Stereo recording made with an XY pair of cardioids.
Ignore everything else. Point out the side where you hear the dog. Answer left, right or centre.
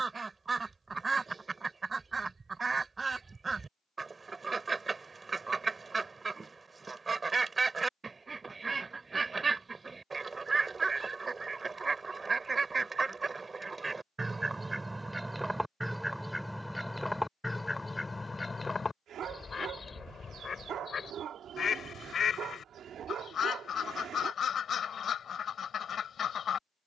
right.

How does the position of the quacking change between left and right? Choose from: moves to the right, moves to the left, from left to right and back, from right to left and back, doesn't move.
moves to the left.